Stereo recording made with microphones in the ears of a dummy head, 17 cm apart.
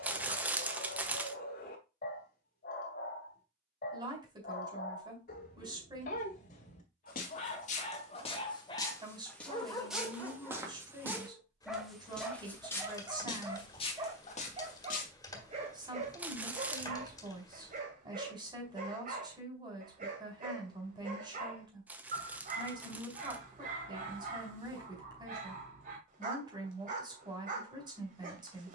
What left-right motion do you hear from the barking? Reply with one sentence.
In this clip you hear the barking move from left to right.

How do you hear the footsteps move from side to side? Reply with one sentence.
In this clip you hear the footsteps go right and come back.